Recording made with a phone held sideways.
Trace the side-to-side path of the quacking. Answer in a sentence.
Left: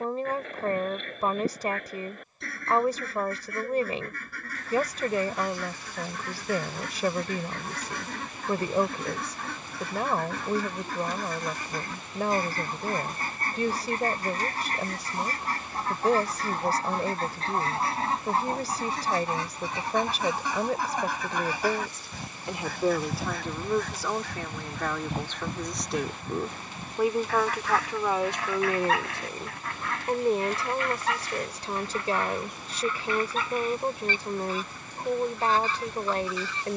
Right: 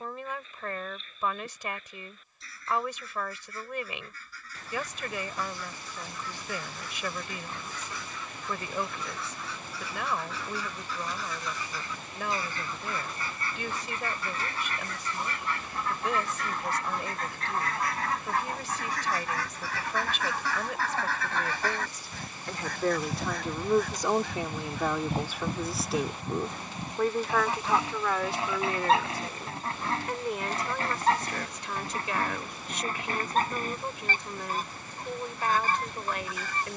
You can hear the quacking go from the left side to the right.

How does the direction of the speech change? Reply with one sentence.
You can hear the speech move from left to right and back again.